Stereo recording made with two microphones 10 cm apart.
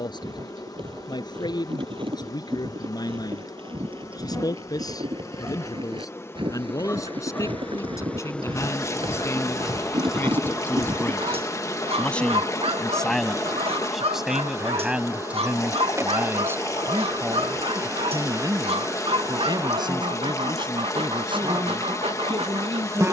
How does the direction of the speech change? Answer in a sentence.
In this clip you hear the speech travel towards the right.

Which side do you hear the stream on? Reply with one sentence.
In this clip you hear the stream on the left.